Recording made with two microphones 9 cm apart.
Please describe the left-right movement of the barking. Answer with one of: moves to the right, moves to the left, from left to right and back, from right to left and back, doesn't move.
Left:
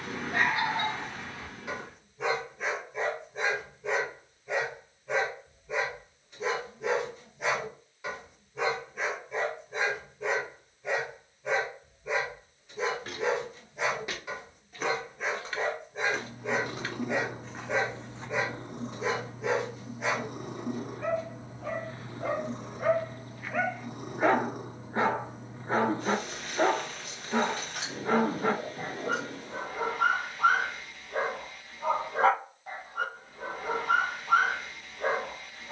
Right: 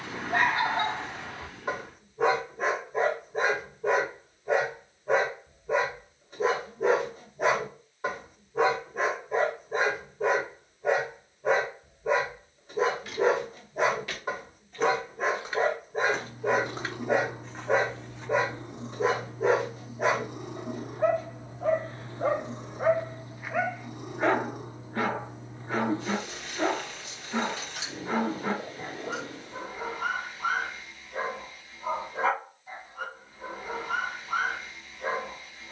moves to the left.